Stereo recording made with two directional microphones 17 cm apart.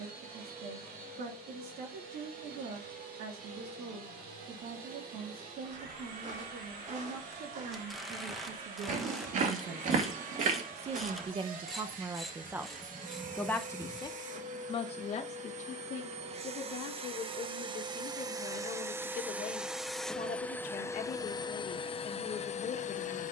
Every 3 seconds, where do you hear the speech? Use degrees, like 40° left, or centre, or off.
70° right, 70° right, 70° right, 40° right, 10° left, 50° left, 50° left, 50° left.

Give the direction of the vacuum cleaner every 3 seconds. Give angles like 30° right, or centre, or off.
70° right, 70° right, 60° right, 60° right, 50° right, 40° right, 10° right, 40° left.